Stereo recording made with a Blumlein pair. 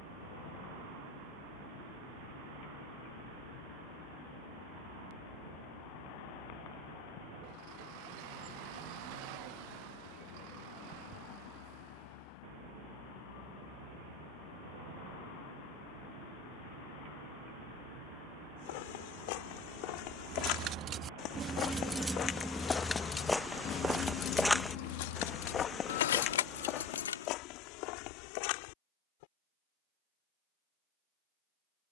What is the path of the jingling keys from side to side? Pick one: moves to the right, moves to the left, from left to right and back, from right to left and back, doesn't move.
moves to the left.